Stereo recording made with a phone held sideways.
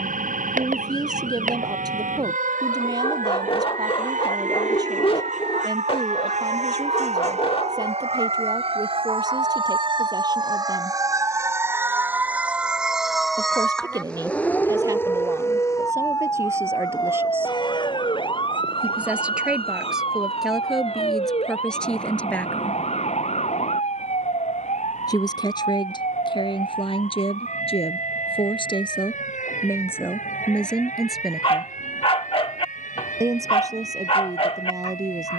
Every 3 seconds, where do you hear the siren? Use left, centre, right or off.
right, right, right, right, centre, left, left, left, left, left, left, left.